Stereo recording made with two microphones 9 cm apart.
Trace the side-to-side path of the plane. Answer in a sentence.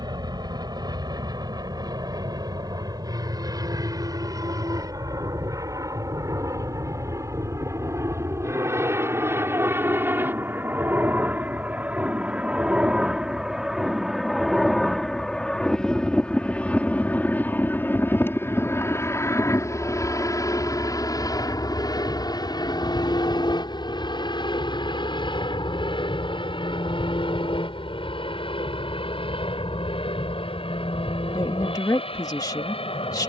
You can hear the plane move to the left.